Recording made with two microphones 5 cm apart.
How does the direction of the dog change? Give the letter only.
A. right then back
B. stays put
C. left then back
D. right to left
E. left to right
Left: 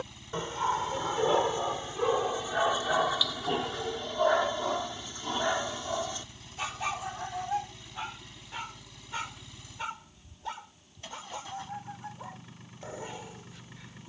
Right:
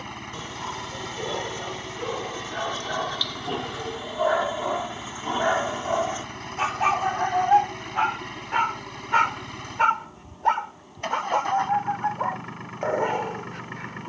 E.